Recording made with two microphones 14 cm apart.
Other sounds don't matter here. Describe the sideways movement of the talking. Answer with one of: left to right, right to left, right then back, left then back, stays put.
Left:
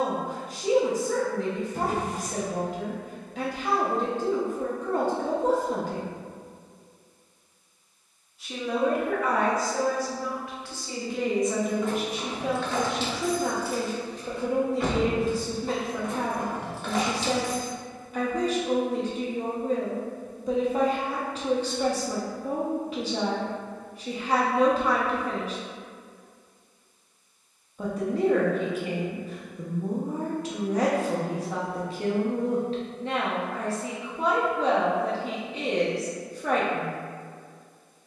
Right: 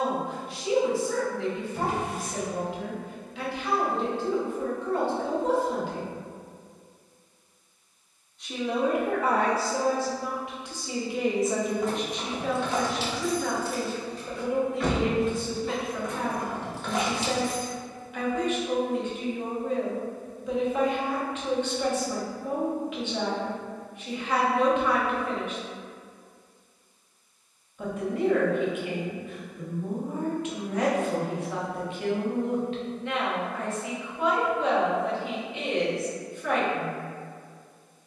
right then back.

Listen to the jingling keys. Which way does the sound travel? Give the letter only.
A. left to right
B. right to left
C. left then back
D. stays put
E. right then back
C.